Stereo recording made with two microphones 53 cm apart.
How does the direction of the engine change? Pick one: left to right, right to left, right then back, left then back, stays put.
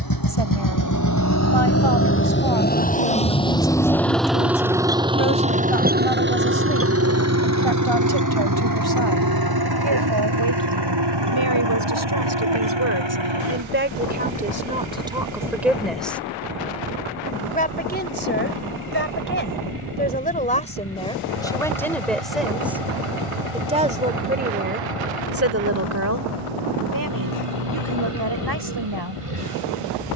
left to right.